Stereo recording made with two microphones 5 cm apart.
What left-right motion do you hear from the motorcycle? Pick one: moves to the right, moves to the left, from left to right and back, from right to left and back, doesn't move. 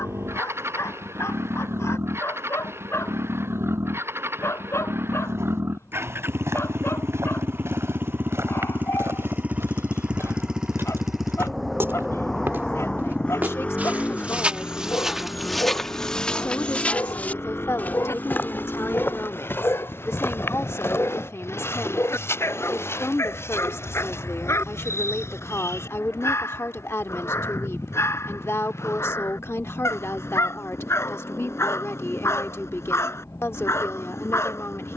moves to the left.